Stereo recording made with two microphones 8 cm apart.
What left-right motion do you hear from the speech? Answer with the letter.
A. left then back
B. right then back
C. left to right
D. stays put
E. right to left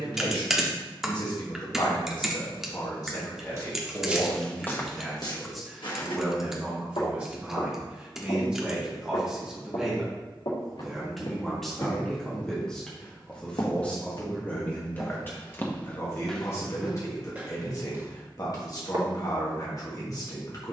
B.